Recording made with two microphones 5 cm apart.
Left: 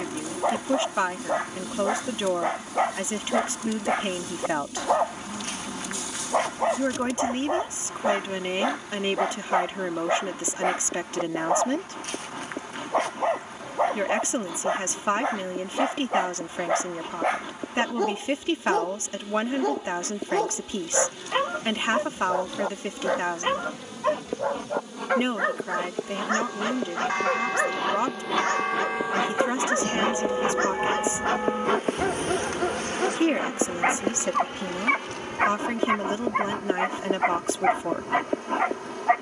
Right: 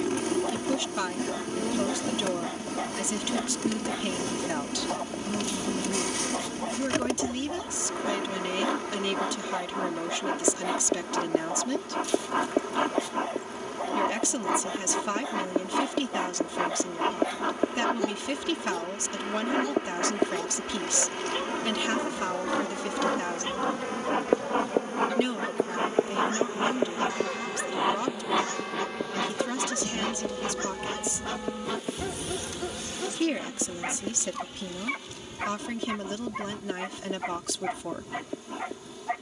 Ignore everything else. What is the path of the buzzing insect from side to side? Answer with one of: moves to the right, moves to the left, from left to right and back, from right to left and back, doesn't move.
moves to the left.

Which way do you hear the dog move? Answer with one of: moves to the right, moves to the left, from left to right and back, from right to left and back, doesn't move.
doesn't move.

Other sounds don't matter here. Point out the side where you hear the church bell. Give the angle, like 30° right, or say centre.
50° left.